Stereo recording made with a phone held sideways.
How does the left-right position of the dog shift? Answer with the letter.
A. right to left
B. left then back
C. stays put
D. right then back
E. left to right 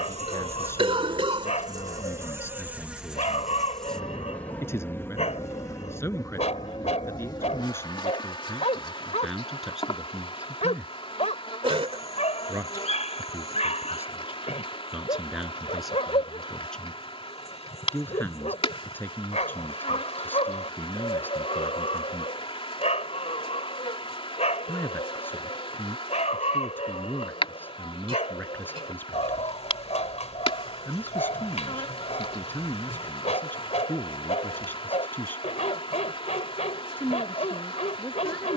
C.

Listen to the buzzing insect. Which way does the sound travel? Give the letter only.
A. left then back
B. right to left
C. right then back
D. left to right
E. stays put
B.